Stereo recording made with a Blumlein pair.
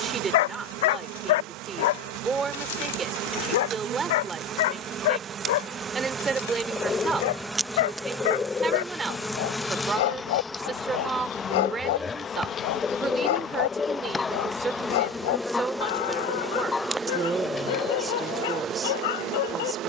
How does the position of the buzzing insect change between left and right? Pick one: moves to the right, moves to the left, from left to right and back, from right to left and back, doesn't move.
from right to left and back.